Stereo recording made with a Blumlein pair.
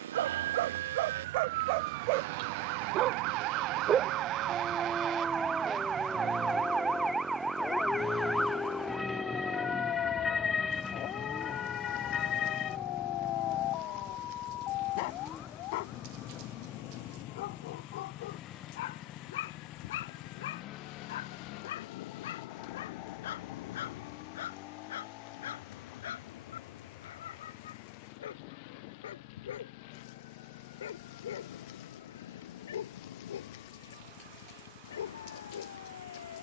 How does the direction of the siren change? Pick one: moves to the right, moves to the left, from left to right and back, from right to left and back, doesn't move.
moves to the left.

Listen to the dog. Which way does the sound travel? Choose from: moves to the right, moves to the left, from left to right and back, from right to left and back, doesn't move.
moves to the left.